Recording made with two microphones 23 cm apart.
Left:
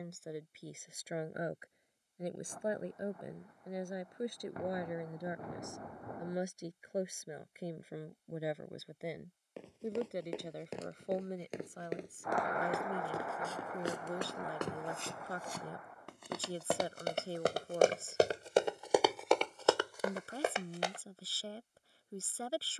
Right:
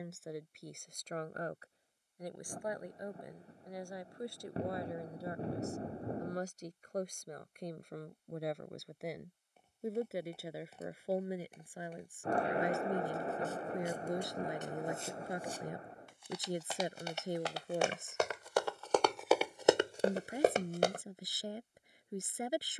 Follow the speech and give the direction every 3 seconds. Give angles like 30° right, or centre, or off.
10° left, 20° left, 10° left, 10° right, 10° right, 20° right, 20° right, 20° right.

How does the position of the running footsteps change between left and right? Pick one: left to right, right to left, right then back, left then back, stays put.
left to right.